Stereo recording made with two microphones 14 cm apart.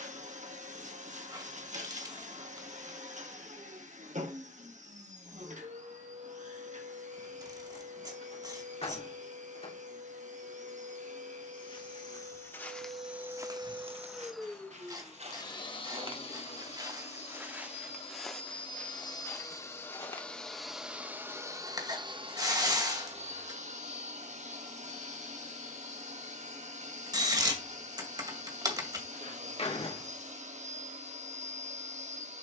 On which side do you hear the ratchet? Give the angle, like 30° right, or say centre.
30° right.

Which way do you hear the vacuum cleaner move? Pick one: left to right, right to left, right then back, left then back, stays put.
left then back.